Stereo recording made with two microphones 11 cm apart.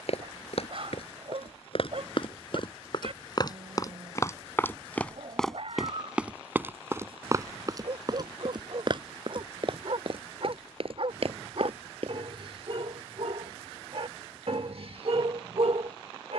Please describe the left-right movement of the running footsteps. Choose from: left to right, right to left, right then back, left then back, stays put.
left to right.